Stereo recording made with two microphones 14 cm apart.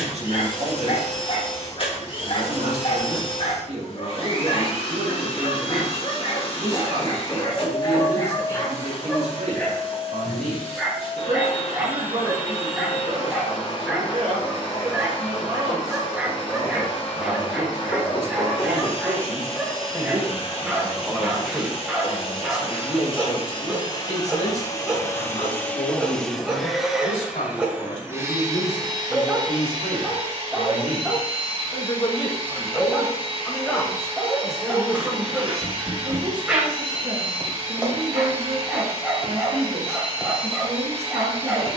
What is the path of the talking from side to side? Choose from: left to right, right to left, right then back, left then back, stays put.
left then back.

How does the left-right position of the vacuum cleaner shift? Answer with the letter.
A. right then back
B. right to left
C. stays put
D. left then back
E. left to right
E.